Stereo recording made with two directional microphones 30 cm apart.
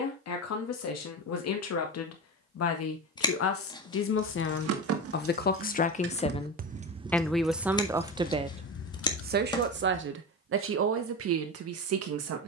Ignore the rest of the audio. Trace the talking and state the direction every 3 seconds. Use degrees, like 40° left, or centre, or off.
60° left, 40° left, centre, 50° right.